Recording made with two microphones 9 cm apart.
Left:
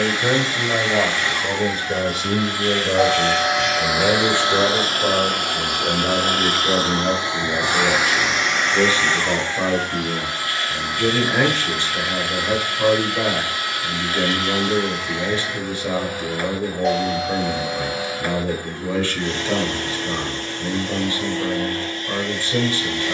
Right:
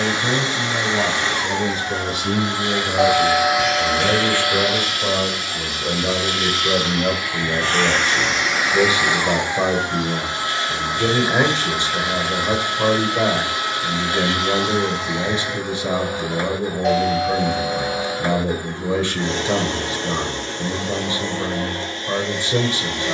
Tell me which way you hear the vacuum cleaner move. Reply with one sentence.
In this clip you hear the vacuum cleaner move from right to left and back again.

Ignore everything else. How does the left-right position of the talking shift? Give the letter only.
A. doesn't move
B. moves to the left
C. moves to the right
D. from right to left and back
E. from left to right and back
C.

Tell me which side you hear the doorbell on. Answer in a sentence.
You can hear the doorbell in the centre.